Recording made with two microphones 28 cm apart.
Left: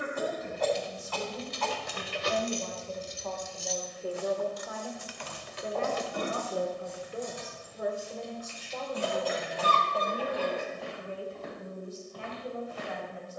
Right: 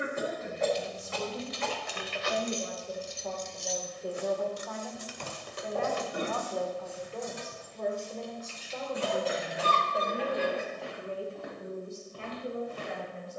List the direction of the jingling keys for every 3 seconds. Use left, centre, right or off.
left, right, right, right, off.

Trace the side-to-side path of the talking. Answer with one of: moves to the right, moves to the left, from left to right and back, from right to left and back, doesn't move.
from right to left and back.